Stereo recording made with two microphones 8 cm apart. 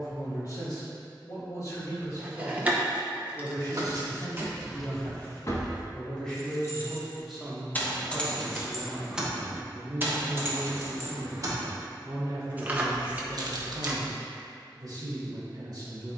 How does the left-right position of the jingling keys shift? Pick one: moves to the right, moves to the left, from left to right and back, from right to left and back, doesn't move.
from right to left and back.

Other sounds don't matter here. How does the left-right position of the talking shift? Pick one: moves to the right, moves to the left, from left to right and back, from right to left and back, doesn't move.
moves to the right.